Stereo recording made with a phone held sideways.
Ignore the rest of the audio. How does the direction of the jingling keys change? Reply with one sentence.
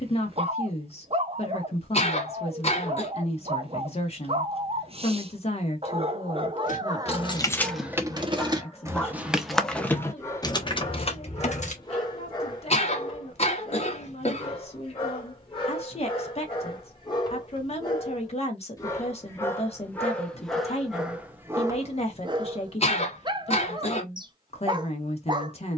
You can hear the jingling keys move from left to right and back again.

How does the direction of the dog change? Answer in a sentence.
In this clip you hear the dog go left and come back.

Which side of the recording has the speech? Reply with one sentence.
In this clip you hear the speech on the left.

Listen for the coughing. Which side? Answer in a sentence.
You can hear the coughing on the left.